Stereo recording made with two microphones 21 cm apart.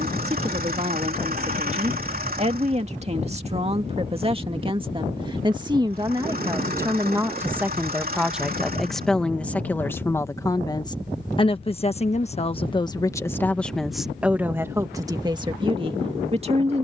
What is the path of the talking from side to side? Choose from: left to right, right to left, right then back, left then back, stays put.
left then back.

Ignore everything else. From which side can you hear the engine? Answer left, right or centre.
right.